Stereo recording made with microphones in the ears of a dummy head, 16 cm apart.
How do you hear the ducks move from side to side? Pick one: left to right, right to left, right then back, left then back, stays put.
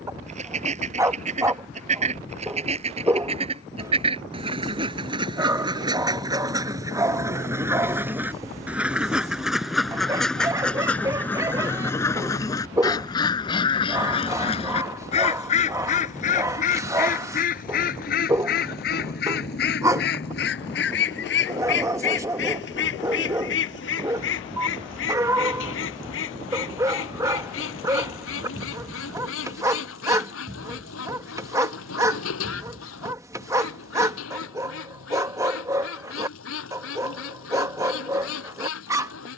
right to left.